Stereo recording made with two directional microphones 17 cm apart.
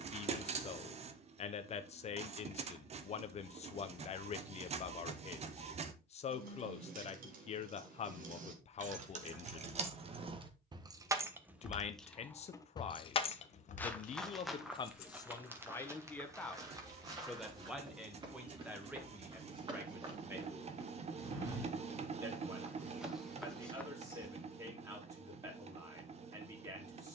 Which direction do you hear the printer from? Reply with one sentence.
You can hear the printer on the right.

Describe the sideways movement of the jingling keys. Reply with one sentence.
In this clip you hear the jingling keys travel towards the left.